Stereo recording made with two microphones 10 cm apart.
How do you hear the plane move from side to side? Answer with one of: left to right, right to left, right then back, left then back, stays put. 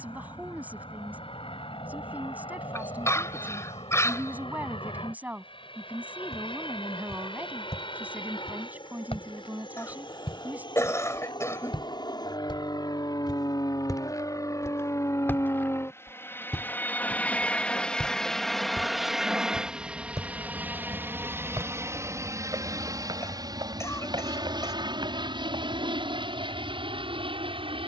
left to right.